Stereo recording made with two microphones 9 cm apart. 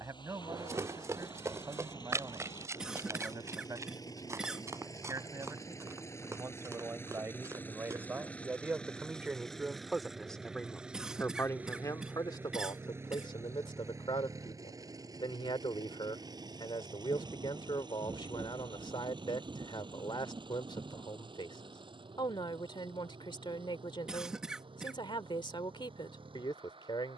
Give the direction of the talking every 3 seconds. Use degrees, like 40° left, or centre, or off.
40° right, 40° right, 30° right, 10° left, 60° left, 60° left, 60° left, 60° left, 60° left.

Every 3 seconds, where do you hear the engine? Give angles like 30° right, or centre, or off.
50° left, 40° left, 20° left, 10° right, 30° right, 50° right, 60° right, 70° right, 70° right.